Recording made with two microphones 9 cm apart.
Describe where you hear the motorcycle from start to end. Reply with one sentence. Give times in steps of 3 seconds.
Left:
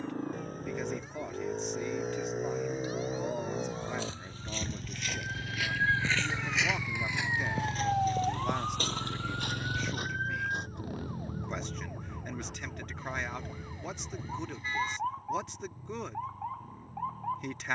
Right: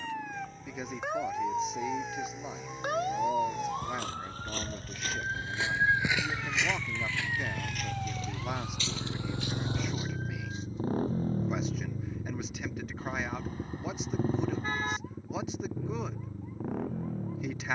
You can hear the motorcycle on the left from 0 s, in the centre from 6 s and on the right from 9 s.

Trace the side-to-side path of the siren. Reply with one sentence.
In this clip you hear the siren move to the left.